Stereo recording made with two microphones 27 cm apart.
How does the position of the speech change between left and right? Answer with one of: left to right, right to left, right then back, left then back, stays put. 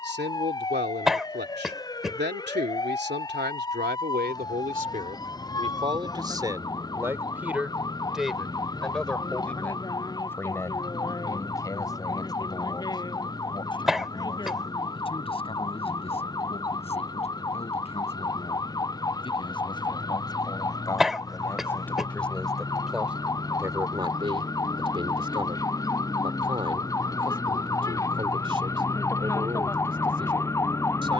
left then back.